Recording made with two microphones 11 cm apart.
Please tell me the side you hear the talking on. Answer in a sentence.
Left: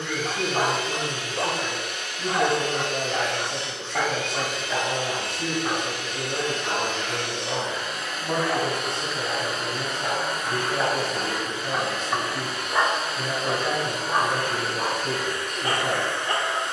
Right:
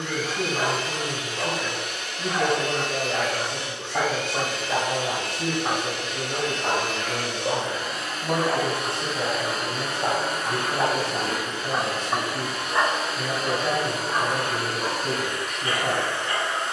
In this clip you hear the talking in the centre.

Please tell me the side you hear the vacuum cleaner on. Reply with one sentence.
You can hear the vacuum cleaner on the right.